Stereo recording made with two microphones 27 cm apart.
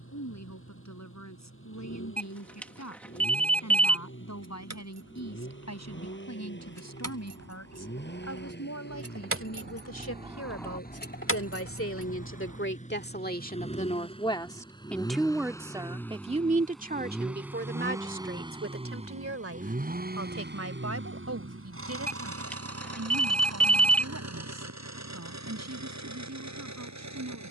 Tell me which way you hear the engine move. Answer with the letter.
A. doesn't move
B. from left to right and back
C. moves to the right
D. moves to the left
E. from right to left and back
C.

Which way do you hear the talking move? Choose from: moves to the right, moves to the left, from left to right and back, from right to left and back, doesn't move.
moves to the right.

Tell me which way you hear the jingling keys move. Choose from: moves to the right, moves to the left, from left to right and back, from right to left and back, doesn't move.
moves to the left.